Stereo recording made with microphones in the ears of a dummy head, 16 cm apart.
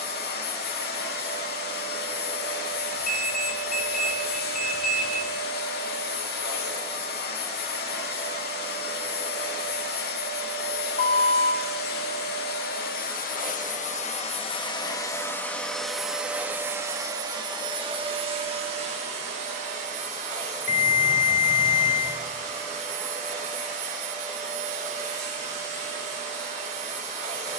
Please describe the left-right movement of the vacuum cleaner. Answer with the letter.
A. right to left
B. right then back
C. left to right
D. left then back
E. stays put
C.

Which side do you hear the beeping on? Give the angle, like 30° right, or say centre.
50° left.